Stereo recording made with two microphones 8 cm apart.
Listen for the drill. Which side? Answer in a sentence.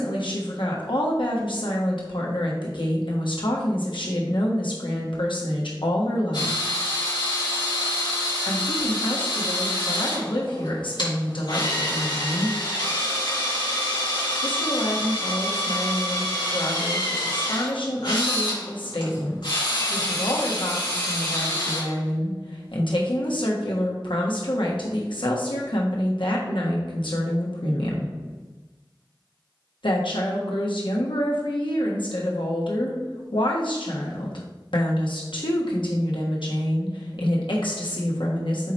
In this clip you hear the drill on the left.